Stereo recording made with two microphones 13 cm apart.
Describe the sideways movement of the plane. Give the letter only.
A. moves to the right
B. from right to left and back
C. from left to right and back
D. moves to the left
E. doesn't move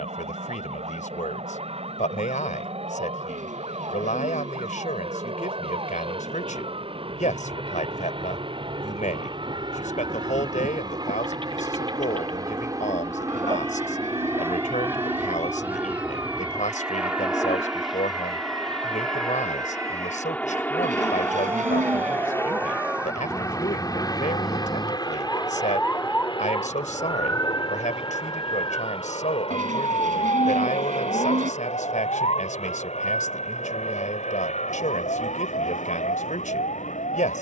D.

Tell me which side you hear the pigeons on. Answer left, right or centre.
right.